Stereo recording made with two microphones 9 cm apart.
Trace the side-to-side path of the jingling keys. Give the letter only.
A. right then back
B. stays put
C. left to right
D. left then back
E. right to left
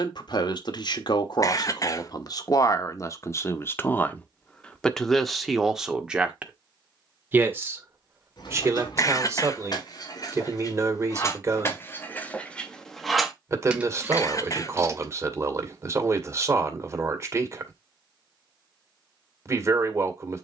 C.